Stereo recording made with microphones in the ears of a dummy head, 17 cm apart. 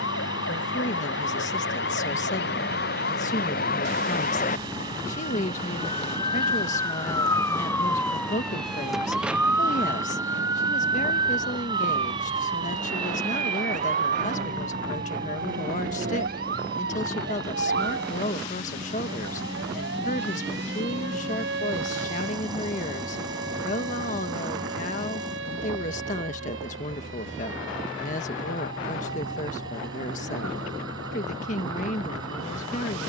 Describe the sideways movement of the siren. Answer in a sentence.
You can hear the siren go from the left side to the right.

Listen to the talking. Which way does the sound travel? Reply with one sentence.
In this clip you hear the talking stay in one place.